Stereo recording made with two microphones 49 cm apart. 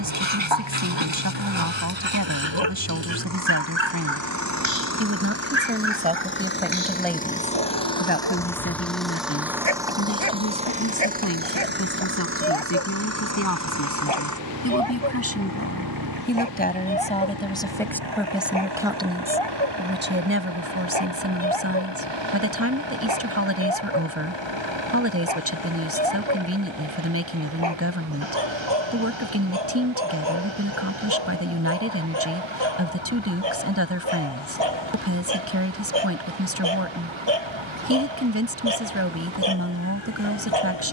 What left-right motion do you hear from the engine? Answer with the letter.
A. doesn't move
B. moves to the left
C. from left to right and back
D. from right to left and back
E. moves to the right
E.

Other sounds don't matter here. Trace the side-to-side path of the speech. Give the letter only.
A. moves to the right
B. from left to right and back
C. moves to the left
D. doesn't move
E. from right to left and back
E.